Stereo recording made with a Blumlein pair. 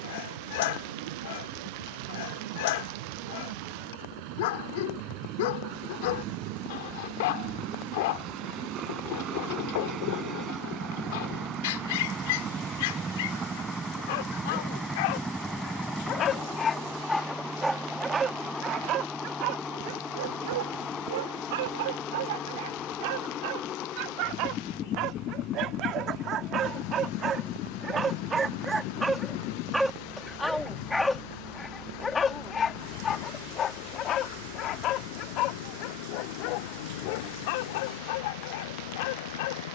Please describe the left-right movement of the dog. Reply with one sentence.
You can hear the dog move from left to right and back again.